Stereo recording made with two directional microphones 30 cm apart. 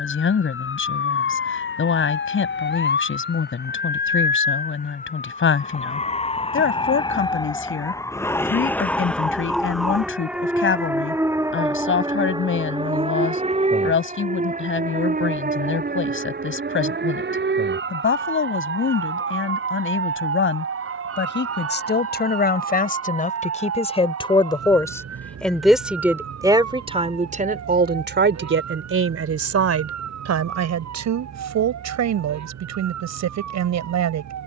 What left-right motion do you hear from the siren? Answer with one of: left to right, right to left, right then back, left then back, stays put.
left to right.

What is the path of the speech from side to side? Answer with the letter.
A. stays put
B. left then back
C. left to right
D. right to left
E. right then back
C.